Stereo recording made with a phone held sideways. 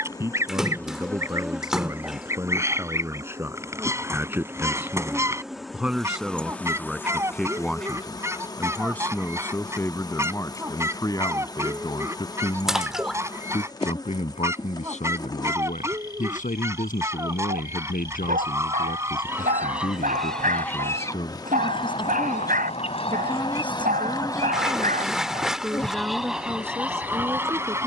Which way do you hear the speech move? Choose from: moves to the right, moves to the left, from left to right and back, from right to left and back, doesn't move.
from right to left and back.